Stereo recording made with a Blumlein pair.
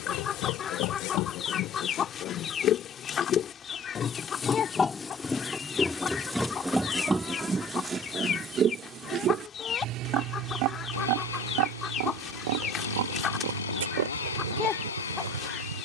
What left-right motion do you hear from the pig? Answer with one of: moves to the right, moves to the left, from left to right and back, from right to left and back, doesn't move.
moves to the right.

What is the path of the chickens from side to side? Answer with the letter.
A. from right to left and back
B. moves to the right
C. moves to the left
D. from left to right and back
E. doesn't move
E.